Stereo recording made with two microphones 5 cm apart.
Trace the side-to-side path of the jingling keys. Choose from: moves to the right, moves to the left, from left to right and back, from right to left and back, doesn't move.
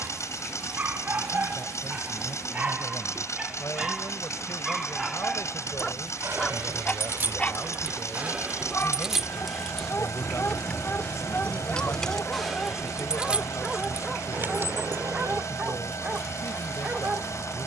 from right to left and back.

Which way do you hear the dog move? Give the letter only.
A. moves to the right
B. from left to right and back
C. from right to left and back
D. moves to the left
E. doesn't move
C.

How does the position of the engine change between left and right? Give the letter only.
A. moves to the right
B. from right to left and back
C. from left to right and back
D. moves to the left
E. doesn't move
E.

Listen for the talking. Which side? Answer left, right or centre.
left.